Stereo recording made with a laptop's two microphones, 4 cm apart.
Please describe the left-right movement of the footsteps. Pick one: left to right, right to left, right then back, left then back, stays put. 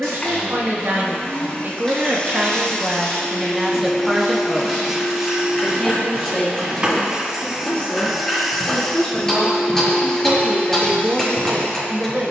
left to right.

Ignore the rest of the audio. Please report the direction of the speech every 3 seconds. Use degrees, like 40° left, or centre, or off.
50° right, centre, 20° left, 20° right.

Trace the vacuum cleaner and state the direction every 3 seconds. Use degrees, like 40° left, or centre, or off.
30° left, 10° right, 10° right, 20° left.